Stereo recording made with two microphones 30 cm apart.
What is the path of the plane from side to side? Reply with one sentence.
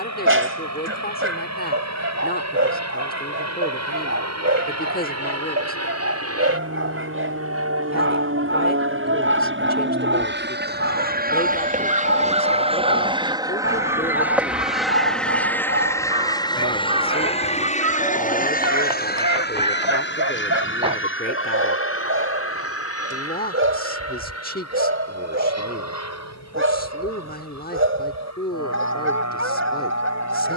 In this clip you hear the plane move from right to left.